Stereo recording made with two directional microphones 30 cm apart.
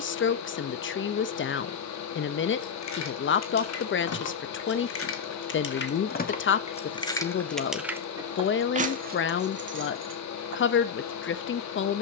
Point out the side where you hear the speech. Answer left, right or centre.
left.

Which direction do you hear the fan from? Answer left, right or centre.
left.